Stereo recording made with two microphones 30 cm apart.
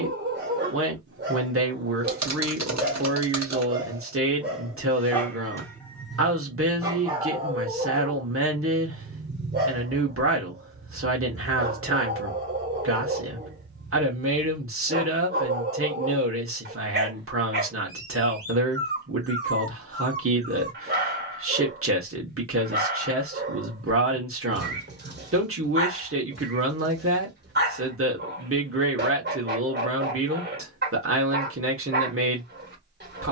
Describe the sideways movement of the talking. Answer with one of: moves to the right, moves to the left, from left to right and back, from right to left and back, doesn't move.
doesn't move.